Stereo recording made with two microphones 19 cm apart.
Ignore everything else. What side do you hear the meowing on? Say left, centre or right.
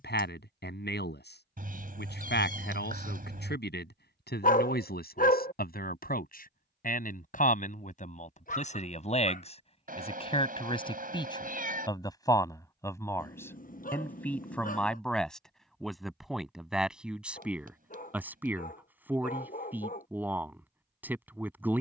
right.